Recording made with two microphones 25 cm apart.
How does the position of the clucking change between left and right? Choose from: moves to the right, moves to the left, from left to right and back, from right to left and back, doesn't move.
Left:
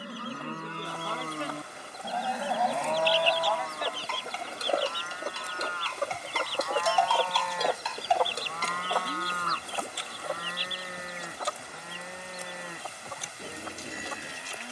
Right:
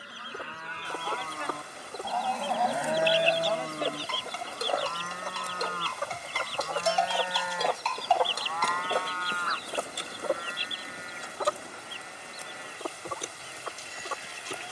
from right to left and back.